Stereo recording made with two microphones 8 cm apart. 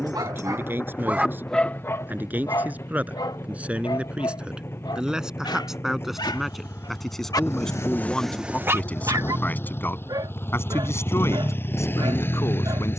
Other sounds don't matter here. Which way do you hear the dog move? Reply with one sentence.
In this clip you hear the dog move from right to left and back again.